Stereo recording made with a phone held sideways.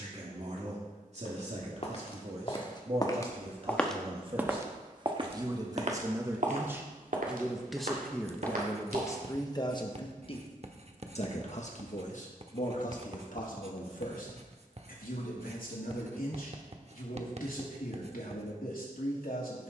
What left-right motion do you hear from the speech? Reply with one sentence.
In this clip you hear the speech move from right to left.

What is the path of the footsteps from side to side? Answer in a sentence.
In this clip you hear the footsteps move from left to right.